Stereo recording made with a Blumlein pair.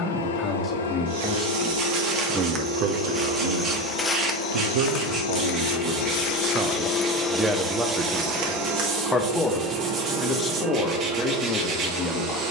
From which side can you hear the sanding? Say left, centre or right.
right.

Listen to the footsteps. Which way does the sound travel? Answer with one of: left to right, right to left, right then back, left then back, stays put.
left then back.